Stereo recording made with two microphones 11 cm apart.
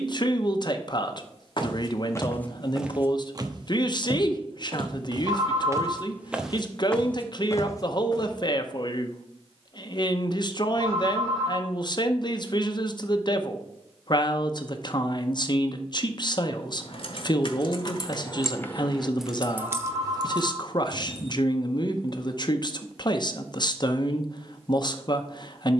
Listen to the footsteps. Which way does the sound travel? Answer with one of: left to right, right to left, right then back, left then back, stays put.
right then back.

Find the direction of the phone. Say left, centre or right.
right.